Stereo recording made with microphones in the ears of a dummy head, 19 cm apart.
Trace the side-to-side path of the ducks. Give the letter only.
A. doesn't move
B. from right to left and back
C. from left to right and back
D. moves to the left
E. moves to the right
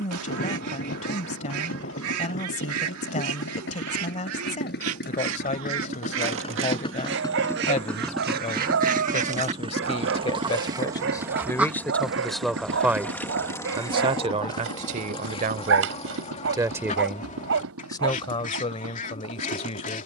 D.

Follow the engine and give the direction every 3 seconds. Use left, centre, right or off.
left, left, centre, right, right, right, right.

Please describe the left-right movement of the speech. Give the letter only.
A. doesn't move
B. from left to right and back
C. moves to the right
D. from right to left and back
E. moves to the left
B.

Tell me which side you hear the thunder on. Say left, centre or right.
left.